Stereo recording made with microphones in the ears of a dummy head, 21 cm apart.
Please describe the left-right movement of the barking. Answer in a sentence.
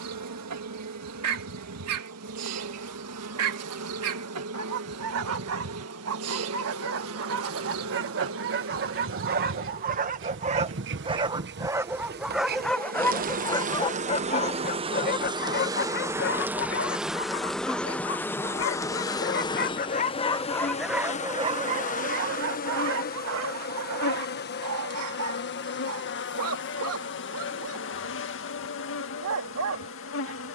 You can hear the barking go left and come back.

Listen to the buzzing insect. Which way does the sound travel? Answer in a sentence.
You can hear the buzzing insect move to the left.